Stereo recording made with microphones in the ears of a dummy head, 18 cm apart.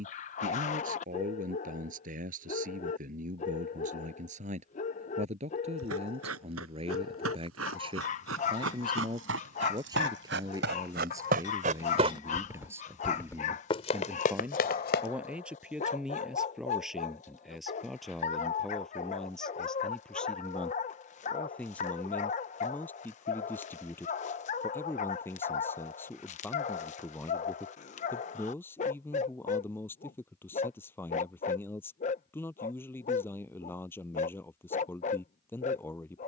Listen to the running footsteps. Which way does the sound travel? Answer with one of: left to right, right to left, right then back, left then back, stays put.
right to left.